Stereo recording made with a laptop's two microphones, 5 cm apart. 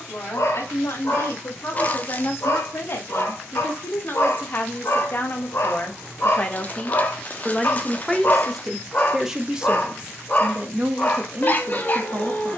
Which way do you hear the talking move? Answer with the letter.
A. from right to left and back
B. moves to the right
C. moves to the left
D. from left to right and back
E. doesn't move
B.